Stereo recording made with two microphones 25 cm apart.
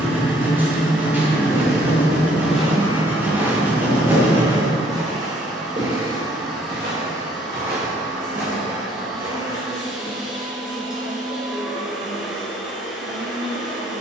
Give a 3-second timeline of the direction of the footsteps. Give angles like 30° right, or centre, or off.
10° left, 20° right, 40° right, 50° right, off.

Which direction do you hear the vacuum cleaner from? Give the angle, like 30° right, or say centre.
centre.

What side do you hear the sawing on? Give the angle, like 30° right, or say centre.
10° right.